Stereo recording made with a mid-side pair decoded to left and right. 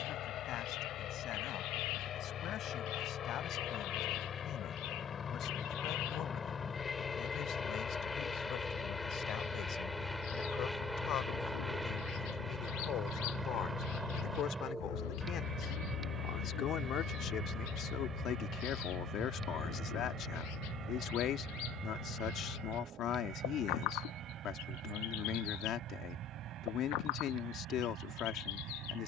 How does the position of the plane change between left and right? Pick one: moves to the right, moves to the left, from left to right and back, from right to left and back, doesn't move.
moves to the right.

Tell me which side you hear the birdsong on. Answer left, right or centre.
left.